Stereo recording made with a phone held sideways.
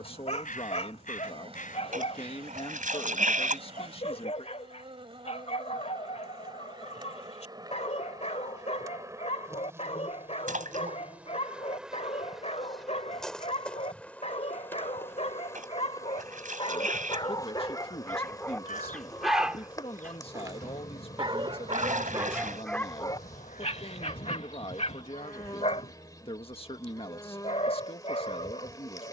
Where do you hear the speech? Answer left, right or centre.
left.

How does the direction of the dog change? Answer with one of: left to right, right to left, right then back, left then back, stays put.
right then back.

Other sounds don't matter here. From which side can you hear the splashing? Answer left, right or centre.
right.